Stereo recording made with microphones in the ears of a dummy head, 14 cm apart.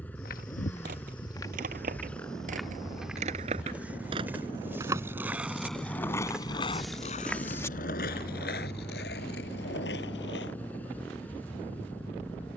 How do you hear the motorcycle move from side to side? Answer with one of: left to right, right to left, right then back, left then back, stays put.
stays put.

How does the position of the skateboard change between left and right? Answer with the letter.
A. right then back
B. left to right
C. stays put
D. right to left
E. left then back
D.